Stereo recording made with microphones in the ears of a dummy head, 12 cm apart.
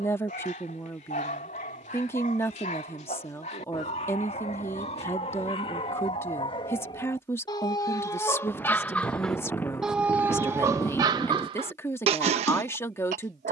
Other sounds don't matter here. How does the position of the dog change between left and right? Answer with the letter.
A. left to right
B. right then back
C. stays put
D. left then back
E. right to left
A.